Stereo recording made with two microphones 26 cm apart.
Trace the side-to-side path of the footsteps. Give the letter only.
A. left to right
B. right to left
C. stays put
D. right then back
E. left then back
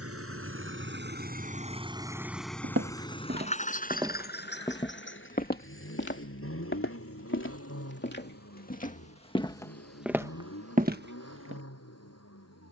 E.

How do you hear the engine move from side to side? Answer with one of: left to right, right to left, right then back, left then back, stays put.
right to left.